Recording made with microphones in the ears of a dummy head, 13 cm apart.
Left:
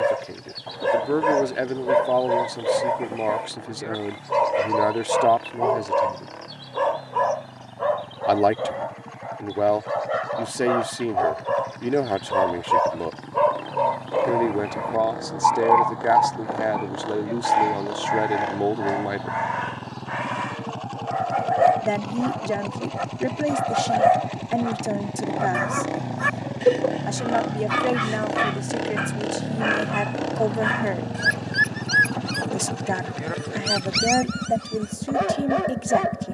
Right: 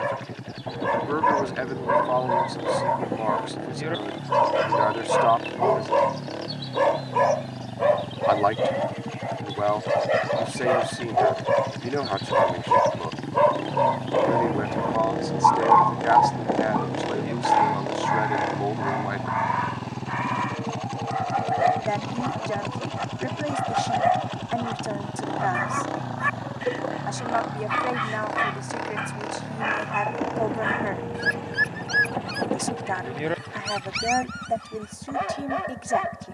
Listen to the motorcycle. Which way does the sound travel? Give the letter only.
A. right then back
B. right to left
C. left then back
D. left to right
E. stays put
B.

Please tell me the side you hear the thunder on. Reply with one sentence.
You can hear the thunder on the right.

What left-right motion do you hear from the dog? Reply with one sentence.
You can hear the dog go right and come back.